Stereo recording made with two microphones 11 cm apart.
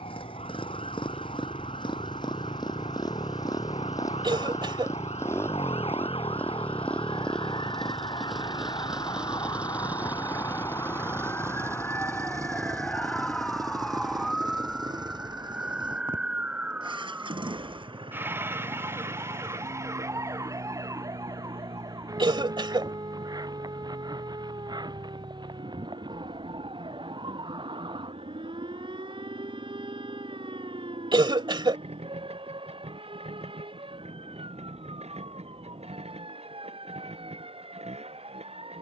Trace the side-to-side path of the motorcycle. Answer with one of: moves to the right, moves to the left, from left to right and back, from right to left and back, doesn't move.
moves to the right.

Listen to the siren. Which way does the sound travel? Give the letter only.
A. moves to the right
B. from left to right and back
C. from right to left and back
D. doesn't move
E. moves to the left
A.